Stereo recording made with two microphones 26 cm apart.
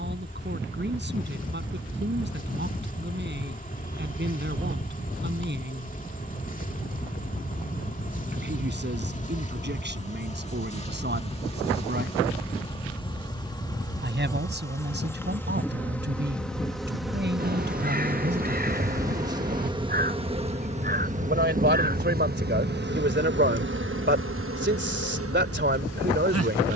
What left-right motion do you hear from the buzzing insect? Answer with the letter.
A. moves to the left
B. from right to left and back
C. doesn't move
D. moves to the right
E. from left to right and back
D.